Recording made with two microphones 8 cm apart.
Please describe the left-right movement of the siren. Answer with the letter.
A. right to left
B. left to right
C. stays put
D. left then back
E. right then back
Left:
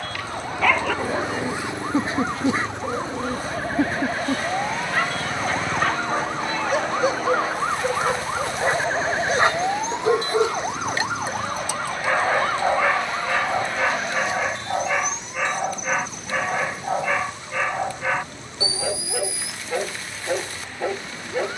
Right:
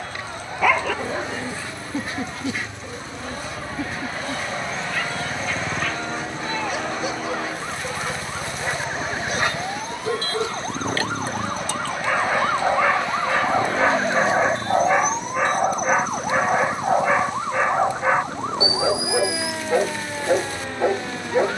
B.